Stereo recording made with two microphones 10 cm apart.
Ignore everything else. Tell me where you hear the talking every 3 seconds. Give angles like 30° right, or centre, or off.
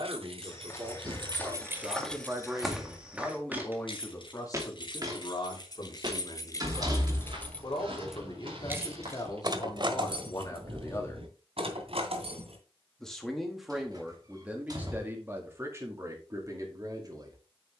30° right, 30° left, 50° left, 40° left, 10° right, 30° right.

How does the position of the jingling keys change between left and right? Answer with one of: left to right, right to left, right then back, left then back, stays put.
left then back.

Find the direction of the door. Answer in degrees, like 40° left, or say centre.
40° right.